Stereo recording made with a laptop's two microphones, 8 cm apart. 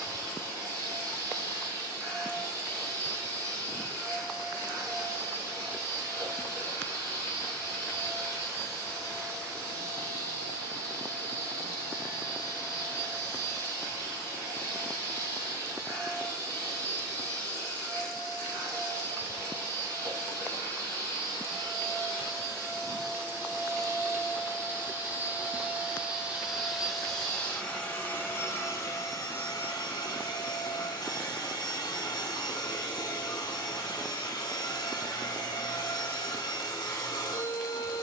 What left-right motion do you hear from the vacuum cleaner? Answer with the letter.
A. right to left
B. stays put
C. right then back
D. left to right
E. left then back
A.